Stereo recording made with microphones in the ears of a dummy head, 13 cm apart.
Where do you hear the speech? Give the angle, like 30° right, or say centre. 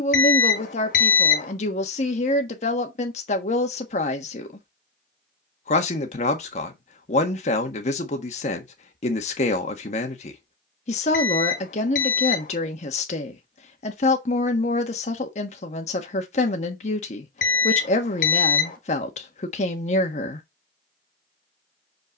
50° left.